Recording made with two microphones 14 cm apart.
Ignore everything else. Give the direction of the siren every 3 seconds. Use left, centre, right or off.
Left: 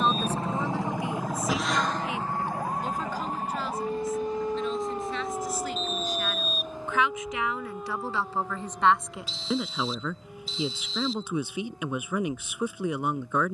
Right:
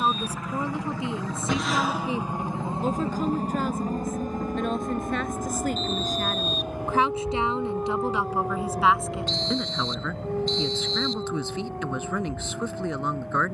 left, left, right, right, right.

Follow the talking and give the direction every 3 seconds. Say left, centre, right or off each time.
right, right, right, centre, centre.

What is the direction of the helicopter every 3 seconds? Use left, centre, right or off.
centre, right, right, right, right.